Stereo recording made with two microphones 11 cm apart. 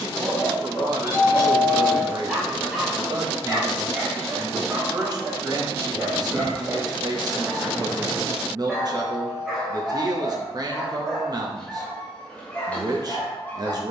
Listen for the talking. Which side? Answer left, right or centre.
right.